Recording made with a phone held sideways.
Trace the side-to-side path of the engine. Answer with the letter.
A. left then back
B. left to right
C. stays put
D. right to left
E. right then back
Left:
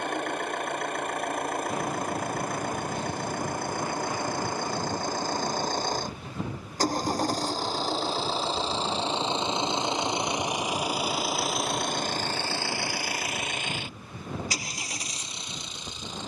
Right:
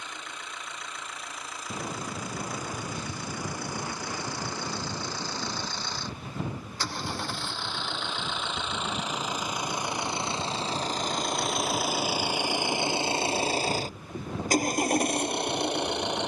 B.